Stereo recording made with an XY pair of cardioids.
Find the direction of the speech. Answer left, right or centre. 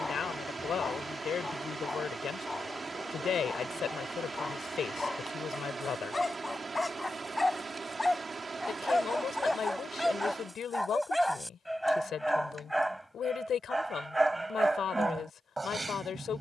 left.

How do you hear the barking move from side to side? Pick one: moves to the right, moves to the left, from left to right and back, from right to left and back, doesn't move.
moves to the right.